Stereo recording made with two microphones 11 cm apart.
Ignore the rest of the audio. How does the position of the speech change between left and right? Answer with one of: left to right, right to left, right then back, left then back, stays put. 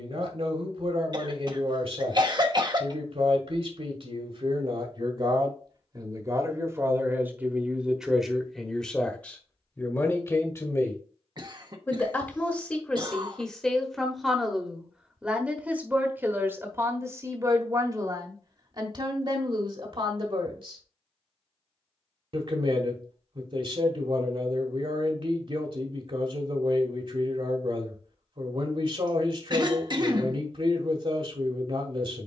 left then back.